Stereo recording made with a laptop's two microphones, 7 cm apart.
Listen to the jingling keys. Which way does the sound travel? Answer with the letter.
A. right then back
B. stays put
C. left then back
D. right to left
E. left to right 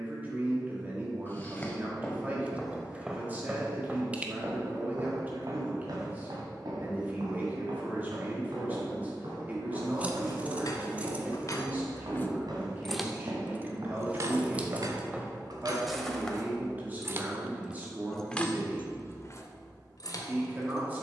A.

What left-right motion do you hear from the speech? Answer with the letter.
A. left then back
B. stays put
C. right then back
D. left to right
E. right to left
B.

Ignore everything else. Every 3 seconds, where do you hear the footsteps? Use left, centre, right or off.
centre, right, right, right, right, centre, off.